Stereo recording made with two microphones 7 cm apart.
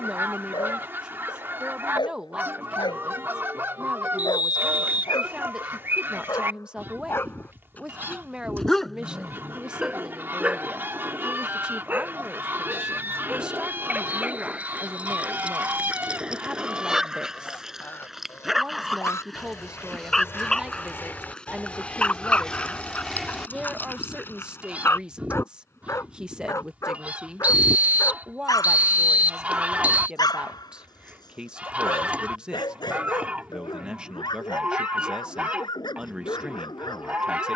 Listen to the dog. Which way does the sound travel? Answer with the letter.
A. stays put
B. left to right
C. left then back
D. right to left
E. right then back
E.